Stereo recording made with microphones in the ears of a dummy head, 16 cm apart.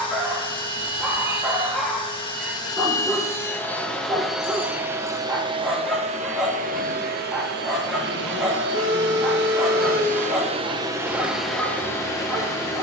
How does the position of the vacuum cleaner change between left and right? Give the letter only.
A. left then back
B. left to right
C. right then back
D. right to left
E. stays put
C.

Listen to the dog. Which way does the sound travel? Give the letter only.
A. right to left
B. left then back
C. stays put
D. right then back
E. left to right
C.